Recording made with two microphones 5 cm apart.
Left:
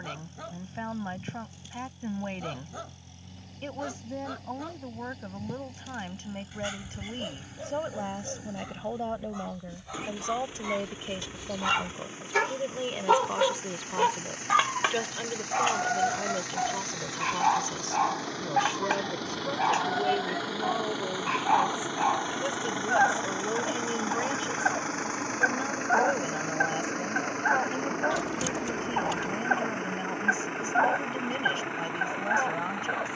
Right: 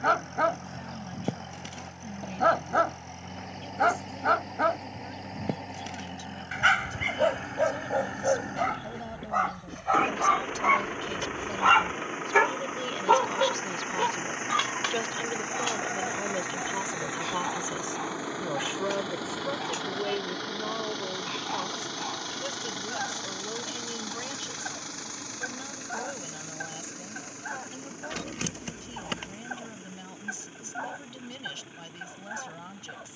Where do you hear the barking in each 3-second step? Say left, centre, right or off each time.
right, right, right, right, centre, left, left, left, left, left, left.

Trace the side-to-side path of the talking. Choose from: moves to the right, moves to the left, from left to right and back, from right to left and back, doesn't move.
from left to right and back.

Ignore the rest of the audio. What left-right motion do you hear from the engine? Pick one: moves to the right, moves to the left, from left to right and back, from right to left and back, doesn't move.
moves to the left.